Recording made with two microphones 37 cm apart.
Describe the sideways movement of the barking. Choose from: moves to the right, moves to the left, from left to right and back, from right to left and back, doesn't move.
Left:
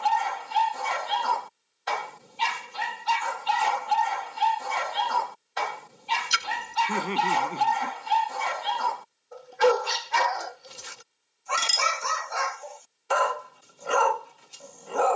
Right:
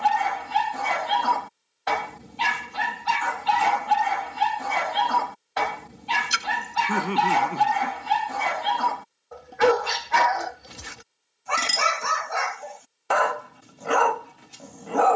doesn't move.